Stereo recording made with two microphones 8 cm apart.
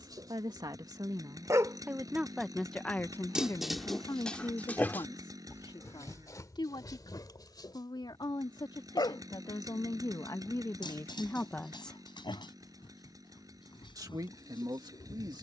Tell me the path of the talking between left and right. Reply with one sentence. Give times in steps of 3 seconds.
You can hear the talking on the right from 0 s, on the left from 3 s and on the right from 12 s.